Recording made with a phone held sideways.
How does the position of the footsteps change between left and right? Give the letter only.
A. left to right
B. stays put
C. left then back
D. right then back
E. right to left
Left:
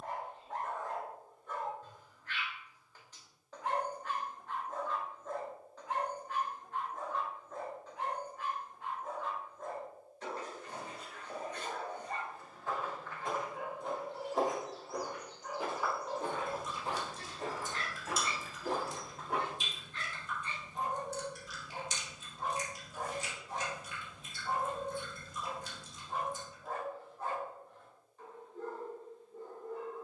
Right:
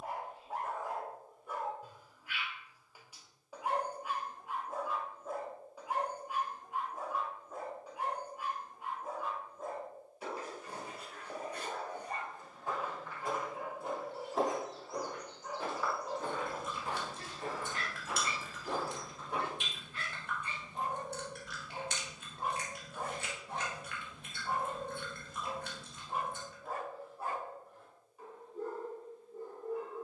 E.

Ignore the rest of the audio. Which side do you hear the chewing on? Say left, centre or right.
right.